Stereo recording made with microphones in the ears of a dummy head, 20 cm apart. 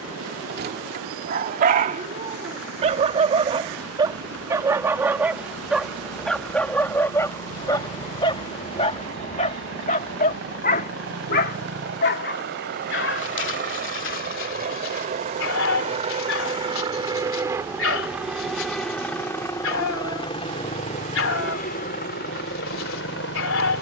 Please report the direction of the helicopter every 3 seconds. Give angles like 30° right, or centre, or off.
70° right, 60° right, 60° right, 50° right, 40° right, 20° right, 10° left, 40° left.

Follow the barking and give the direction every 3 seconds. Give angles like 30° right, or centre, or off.
40° right, 10° right, 10° left, 40° left, 50° left, 60° left, 60° left, 60° left.